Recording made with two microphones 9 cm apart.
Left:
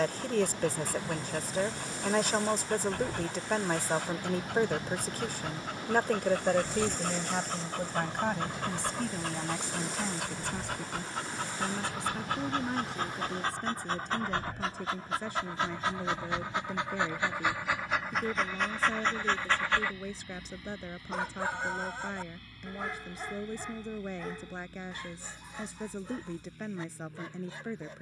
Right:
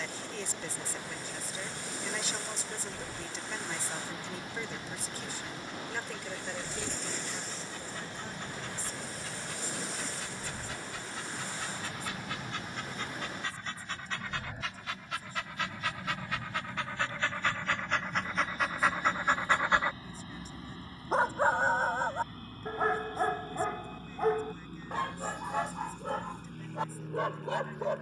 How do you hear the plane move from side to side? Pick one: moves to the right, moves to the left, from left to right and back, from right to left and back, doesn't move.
moves to the right.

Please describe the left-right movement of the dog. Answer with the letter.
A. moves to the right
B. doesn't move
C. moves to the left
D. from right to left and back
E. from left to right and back
A.